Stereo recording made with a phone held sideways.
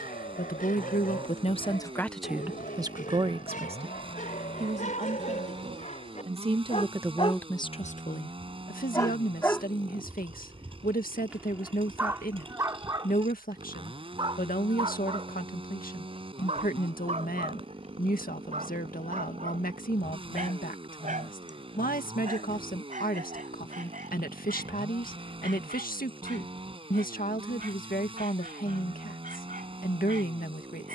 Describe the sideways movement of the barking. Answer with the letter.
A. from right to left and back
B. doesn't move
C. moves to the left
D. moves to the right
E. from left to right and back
D.